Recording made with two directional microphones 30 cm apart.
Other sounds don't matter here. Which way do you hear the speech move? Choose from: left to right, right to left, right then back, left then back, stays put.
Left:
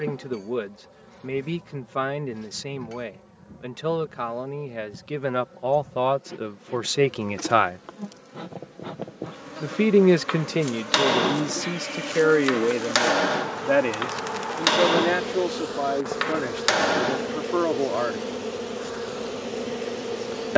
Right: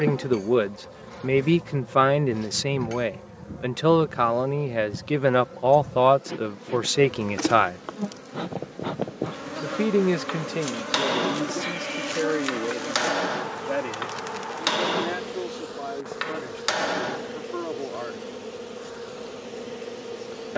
right to left.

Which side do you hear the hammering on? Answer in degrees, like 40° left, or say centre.
20° left.